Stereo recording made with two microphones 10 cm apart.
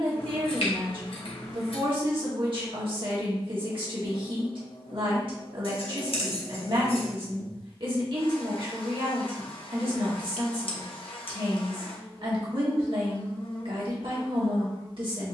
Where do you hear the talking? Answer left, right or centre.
right.